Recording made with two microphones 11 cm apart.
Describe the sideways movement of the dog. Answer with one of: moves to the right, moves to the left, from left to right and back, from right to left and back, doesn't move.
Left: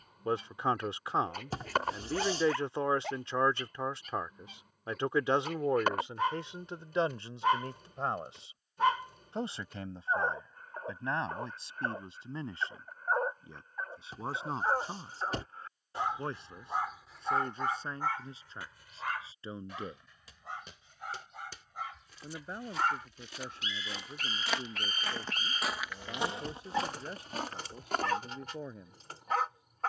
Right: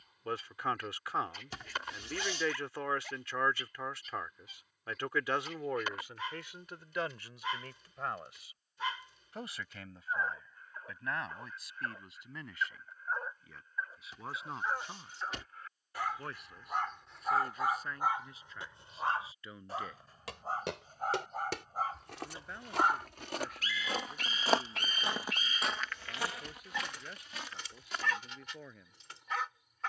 from left to right and back.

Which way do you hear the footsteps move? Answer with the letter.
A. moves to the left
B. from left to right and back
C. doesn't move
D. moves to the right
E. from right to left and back
A.